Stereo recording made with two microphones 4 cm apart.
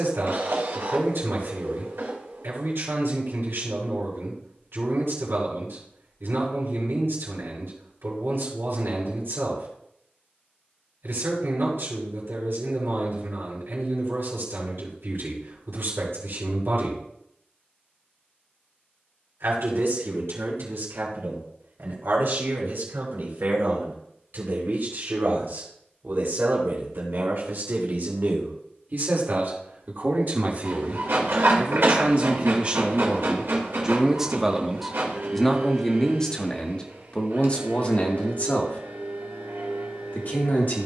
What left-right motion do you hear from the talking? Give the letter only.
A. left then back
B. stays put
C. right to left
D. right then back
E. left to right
C.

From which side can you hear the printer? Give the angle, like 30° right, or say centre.
70° right.